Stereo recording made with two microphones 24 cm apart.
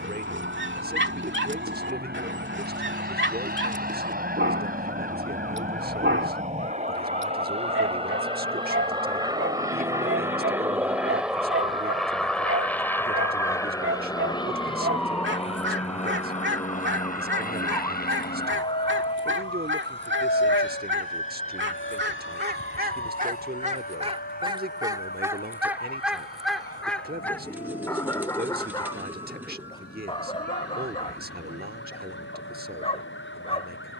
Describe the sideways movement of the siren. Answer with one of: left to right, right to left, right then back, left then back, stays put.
right to left.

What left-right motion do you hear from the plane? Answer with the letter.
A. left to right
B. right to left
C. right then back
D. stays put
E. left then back
B.